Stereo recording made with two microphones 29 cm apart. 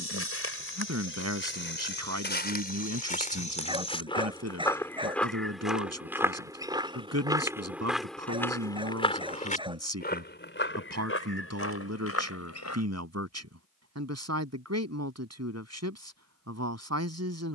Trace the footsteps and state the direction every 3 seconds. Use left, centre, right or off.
left, centre, centre, left, left, off.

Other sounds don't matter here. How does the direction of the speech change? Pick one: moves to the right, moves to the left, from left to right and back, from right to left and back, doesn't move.
doesn't move.